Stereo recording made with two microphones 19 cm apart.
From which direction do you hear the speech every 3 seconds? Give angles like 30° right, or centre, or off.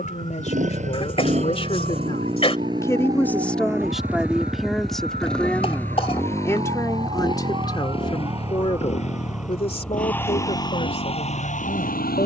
30° left, centre, 20° left, 30° left.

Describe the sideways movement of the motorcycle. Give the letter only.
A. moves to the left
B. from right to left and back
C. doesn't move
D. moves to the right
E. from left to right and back
A.